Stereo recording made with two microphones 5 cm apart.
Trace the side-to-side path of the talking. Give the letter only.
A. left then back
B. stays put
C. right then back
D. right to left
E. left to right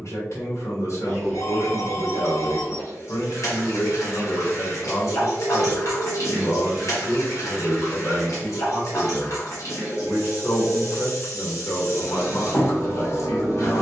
B.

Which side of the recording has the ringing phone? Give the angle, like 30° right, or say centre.
60° left.